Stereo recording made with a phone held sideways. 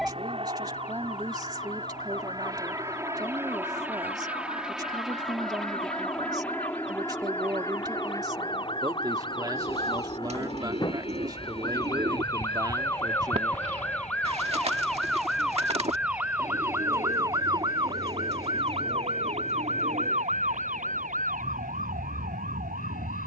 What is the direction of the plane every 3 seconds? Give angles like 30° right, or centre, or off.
30° right, 10° right, 20° left, 30° left, 50° left, 50° left, 60° left, 60° left.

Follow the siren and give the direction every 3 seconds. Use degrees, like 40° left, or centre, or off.
50° left, 50° left, 40° left, 30° left, 10° left, 20° right, 50° right, 70° right.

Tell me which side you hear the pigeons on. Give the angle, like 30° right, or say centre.
50° right.